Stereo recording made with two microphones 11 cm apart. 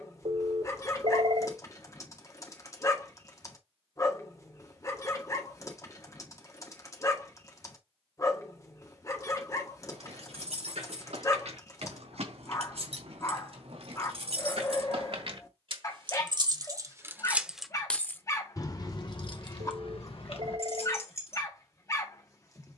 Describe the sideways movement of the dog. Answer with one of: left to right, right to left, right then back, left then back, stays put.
stays put.